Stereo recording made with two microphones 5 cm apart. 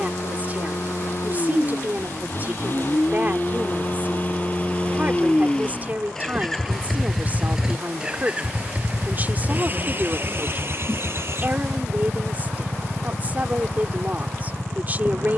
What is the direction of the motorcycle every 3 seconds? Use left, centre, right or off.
left, left, centre, right, right.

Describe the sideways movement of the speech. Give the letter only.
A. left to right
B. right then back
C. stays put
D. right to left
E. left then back
C.